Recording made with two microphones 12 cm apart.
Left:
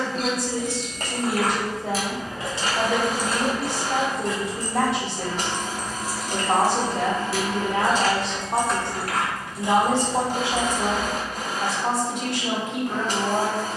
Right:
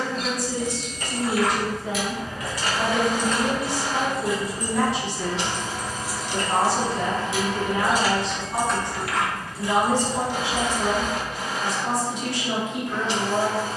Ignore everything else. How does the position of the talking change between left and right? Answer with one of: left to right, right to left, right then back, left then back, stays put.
stays put.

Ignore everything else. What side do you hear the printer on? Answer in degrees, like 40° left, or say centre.
50° left.